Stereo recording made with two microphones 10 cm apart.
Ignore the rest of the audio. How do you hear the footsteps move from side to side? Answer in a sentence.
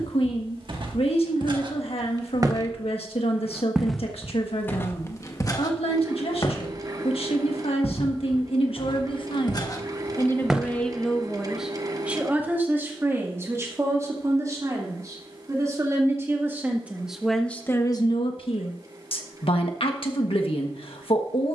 You can hear the footsteps go left and come back.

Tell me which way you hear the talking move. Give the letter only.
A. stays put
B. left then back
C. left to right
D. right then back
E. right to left
D.